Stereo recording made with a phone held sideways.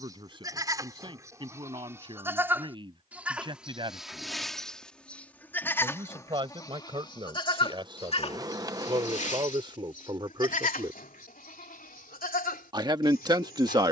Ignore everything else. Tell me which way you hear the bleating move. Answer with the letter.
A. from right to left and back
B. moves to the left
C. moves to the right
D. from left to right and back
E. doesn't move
B.